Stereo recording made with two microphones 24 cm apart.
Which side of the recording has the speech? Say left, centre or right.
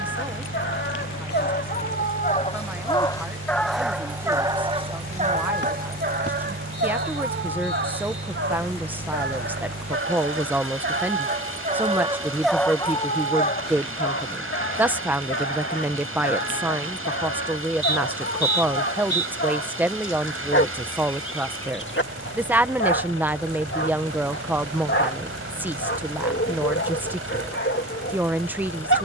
centre.